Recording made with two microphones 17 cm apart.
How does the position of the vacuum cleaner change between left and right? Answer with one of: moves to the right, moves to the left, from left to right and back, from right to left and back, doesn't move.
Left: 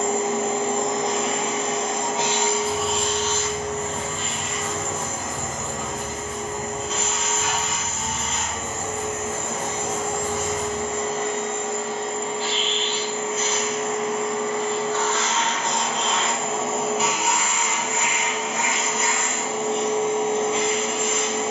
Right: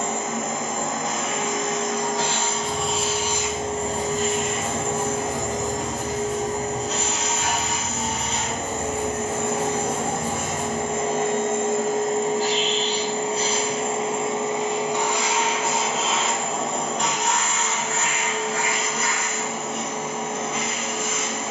from left to right and back.